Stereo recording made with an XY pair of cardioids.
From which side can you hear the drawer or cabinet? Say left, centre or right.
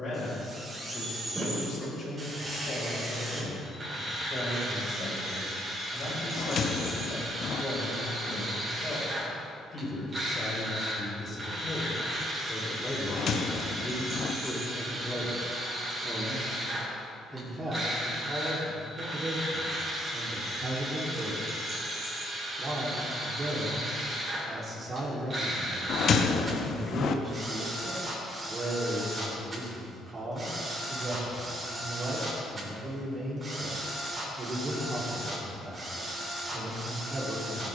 left.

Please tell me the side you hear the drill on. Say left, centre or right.
right.